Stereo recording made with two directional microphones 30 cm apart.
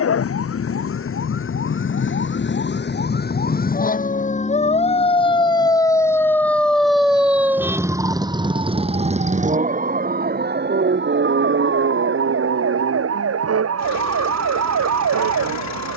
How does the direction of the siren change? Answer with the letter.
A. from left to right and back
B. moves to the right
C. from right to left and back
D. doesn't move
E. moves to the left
B.